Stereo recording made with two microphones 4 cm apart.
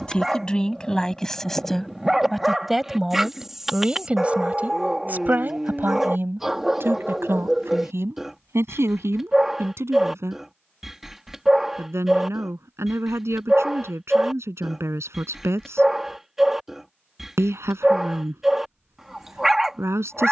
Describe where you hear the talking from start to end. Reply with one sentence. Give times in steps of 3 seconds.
In this clip you hear the talking in the centre from 0 s and on the right from 3 s.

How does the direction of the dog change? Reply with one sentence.
In this clip you hear the dog stay put.